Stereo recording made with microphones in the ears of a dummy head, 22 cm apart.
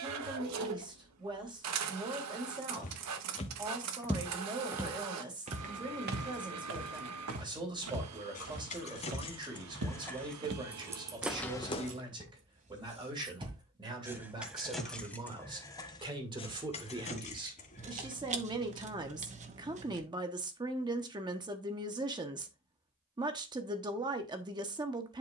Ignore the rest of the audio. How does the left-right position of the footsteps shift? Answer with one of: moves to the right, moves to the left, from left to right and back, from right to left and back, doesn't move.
from left to right and back.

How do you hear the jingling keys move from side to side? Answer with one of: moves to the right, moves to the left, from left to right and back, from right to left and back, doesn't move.
from left to right and back.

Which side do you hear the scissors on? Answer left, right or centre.
right.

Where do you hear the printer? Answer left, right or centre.
right.